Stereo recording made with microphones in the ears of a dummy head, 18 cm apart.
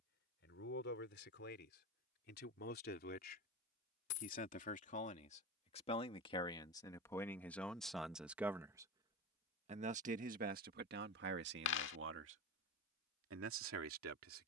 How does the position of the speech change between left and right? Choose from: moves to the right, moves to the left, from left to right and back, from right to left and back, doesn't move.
moves to the right.